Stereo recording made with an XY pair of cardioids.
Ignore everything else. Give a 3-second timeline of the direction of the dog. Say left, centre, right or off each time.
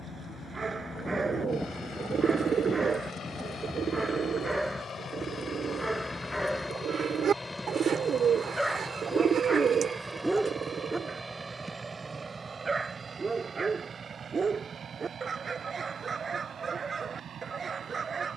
right, centre, centre, centre, right, right.